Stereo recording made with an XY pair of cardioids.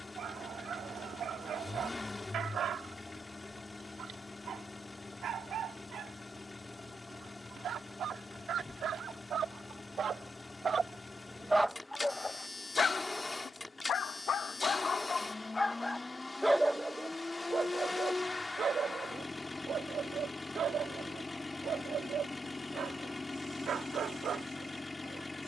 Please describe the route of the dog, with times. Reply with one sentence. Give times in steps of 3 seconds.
You can hear the dog on the right from 0 s, on the left from 12 s, in the centre from 15 s and on the right from 18 s.